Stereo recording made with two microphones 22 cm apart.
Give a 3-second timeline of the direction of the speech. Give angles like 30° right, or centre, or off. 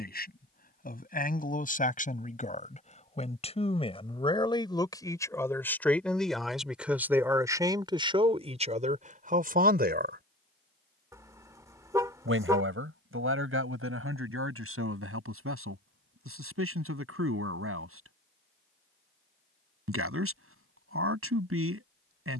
40° left, 20° left, 10° right, 40° right, 70° right, 80° right, 80° right, 80° right.